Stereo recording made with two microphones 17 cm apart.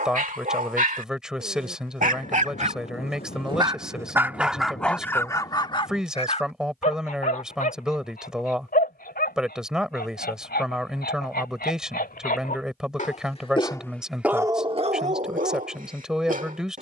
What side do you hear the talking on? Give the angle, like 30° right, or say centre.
centre.